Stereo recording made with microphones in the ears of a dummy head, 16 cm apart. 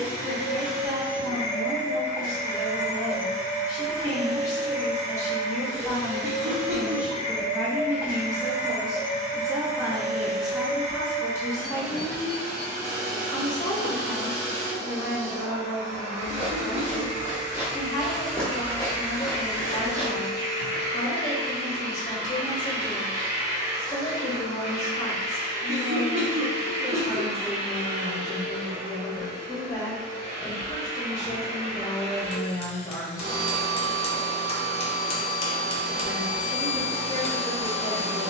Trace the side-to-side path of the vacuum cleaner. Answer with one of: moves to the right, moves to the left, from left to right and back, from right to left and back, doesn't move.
doesn't move.